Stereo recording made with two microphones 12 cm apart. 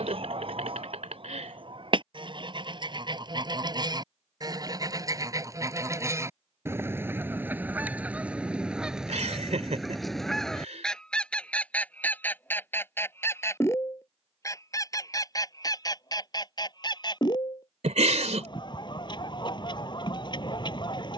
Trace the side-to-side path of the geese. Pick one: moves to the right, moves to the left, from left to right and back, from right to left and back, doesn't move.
moves to the left.